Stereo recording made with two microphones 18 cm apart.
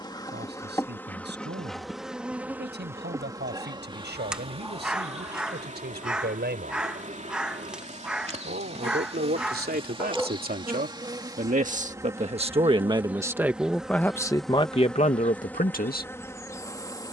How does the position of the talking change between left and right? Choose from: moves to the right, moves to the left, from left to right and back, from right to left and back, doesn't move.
moves to the left.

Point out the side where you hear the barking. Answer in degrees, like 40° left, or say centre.
centre.